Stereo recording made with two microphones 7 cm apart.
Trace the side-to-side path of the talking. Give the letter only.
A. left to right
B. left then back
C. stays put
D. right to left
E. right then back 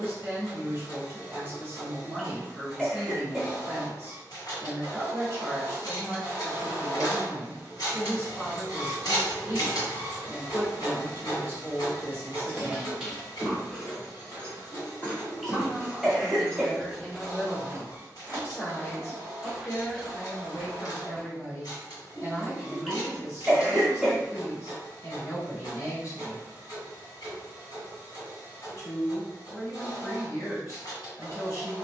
D.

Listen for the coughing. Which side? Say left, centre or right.
centre.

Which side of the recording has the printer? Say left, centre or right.
left.